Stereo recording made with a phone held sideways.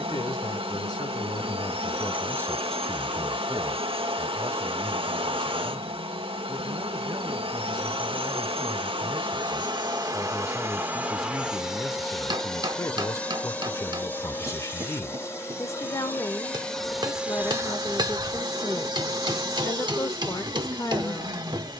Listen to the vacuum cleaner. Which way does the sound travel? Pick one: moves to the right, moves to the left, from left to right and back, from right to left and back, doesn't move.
from right to left and back.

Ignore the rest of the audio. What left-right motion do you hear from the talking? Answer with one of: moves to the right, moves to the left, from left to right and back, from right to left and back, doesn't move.
from left to right and back.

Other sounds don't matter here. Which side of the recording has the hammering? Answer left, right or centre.
right.